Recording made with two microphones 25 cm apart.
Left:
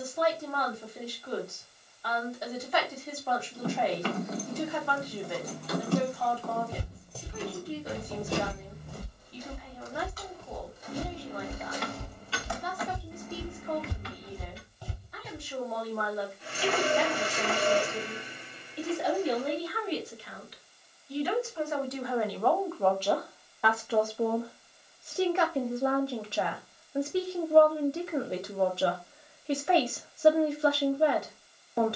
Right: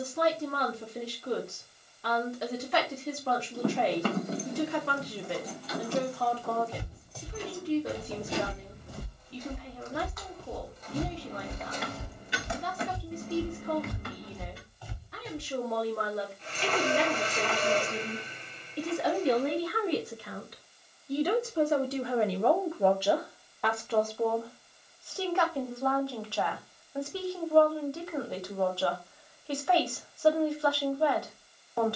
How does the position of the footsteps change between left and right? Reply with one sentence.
You can hear the footsteps move from left to right and back again.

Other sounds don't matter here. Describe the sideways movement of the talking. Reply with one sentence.
In this clip you hear the talking go from the right side to the left.